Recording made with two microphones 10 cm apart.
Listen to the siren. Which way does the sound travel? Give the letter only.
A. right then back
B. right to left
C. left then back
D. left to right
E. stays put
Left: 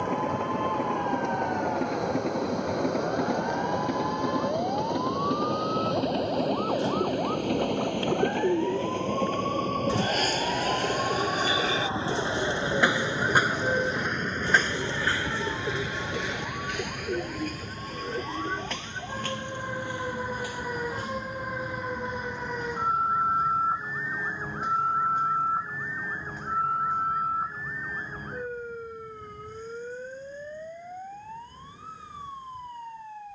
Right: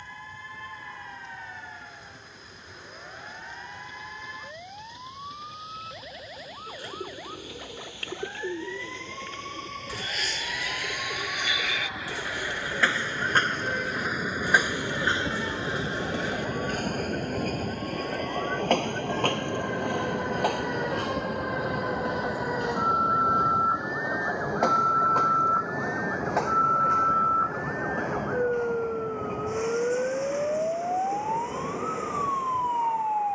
D.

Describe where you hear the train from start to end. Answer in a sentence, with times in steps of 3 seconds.
In this clip you hear the train on the left from 0 s, in the centre from 12 s and on the right from 15 s.